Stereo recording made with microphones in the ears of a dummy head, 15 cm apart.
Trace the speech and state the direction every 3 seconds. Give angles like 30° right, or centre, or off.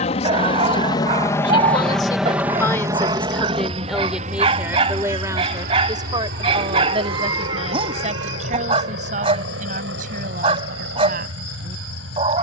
30° left, 10° right, 40° right, 50° right.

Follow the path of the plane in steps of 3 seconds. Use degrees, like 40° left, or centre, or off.
10° left, 40° right, 60° right, 70° right.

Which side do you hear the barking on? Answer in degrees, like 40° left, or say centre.
40° right.